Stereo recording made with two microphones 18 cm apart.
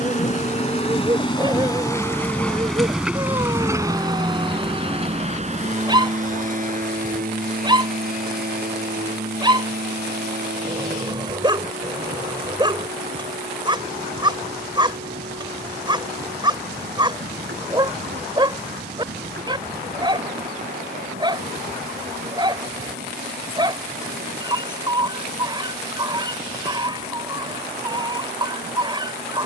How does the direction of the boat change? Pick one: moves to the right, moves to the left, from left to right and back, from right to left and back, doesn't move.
moves to the right.